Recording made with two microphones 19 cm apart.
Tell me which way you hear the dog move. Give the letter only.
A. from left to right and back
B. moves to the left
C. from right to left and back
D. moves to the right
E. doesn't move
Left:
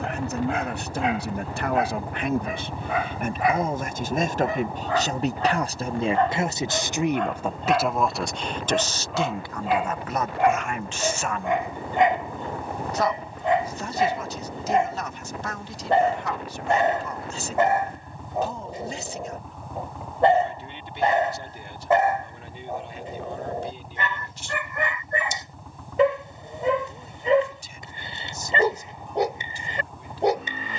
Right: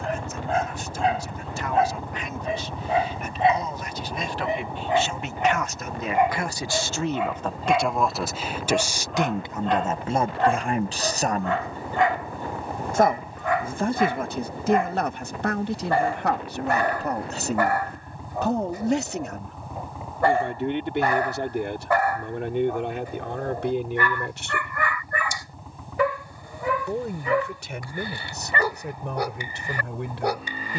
B.